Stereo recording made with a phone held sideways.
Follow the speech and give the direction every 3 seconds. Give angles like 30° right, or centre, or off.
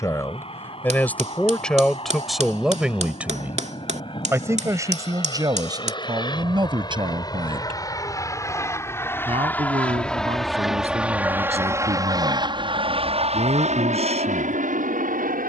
10° left, 20° right, 40° right, 50° right, 50° right.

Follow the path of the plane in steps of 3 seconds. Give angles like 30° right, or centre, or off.
50° left, 40° left, 30° left, centre, 50° right.